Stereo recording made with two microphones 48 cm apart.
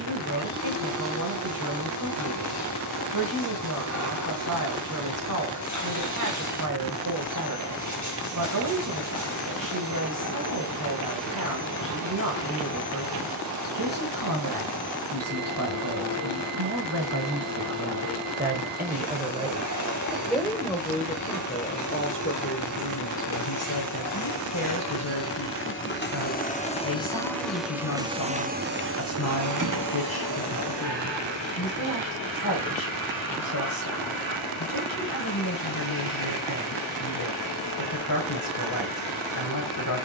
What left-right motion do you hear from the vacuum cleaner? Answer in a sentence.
You can hear the vacuum cleaner travel towards the right.